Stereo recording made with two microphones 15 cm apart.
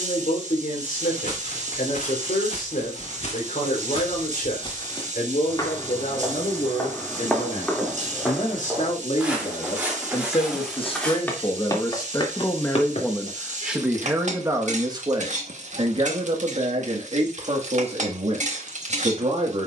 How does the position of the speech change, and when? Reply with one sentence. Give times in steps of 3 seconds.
You can hear the speech on the left from 0 s, in the centre from 12 s and on the right from 15 s.